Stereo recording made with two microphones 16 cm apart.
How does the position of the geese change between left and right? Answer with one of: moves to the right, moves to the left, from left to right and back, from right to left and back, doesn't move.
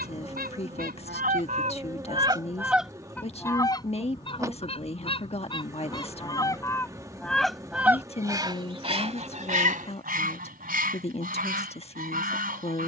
from right to left and back.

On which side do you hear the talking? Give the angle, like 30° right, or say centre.
40° left.